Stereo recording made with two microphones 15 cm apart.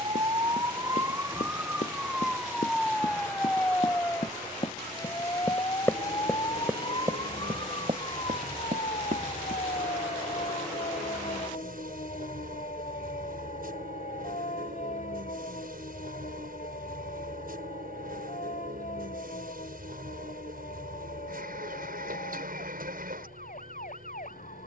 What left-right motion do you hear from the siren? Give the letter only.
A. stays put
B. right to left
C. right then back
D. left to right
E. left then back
B.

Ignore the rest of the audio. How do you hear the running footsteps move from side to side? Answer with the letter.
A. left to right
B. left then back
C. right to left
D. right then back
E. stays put
A.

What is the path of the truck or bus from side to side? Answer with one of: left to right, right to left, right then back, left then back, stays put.
stays put.